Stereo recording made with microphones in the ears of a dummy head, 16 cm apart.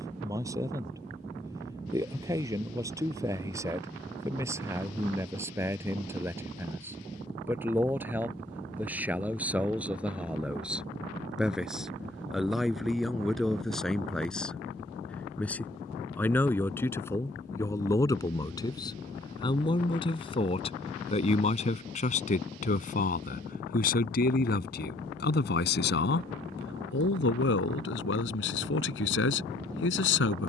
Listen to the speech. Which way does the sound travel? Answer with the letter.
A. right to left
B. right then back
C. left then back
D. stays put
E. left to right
A.